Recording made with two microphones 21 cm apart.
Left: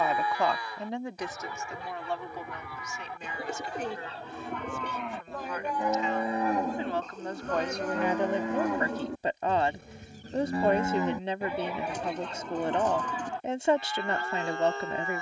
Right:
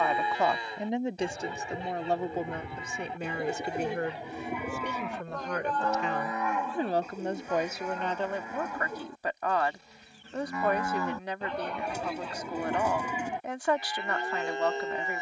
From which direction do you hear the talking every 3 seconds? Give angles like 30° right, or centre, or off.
30° right, 60° right, 10° right, 20° left, 20° left.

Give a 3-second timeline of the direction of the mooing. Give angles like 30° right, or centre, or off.
20° right, 10° right, 60° left, 30° left, 10° right.